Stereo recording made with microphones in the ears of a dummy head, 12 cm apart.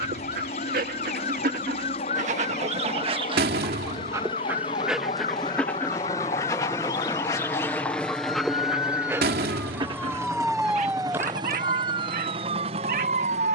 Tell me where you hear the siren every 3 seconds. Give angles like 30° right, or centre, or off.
60° left, 50° left, 40° left, 10° right, 50° right.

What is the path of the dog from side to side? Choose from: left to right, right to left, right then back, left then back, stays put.
left then back.